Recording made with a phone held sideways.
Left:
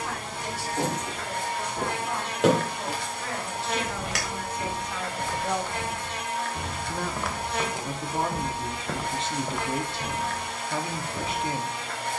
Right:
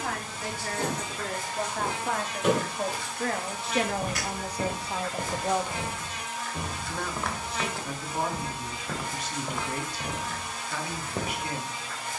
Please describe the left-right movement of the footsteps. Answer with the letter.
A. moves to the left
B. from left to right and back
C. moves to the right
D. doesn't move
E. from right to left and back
E.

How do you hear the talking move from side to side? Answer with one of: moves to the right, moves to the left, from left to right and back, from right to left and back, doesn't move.
moves to the left.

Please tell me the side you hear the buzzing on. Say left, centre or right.
left.